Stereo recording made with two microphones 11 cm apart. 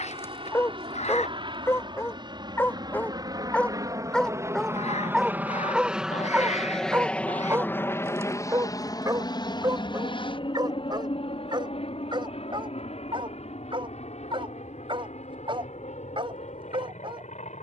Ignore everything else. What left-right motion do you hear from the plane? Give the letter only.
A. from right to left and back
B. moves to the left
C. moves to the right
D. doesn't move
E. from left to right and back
B.